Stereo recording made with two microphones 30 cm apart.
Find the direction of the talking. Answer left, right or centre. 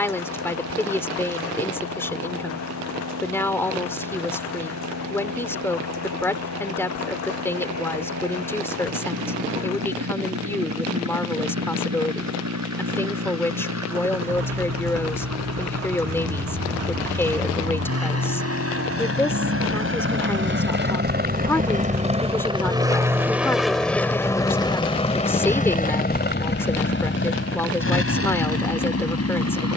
centre.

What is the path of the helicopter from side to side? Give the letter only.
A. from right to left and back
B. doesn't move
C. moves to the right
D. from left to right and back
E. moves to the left
E.